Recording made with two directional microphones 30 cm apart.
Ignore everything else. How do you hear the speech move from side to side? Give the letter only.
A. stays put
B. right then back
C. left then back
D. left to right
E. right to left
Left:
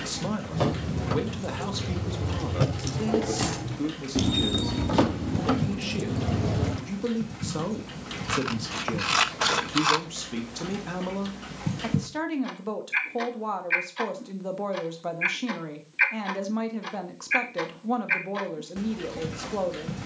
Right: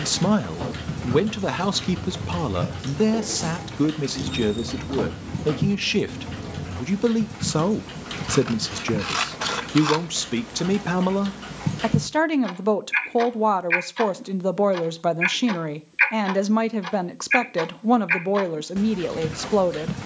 A.